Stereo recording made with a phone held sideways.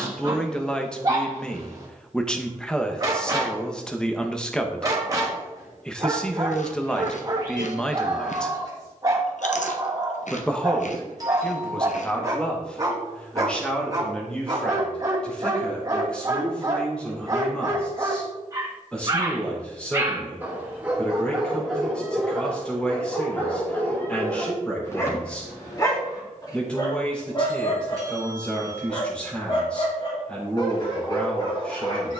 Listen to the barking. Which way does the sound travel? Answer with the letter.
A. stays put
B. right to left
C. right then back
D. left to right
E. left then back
B.